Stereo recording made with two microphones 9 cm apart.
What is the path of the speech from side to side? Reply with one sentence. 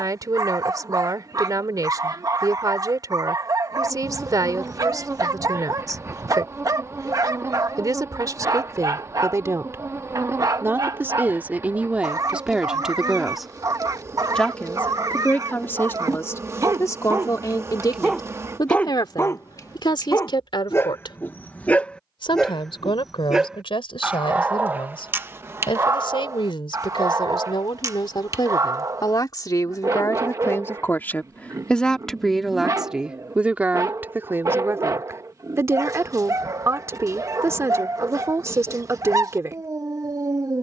You can hear the speech move from right to left and back again.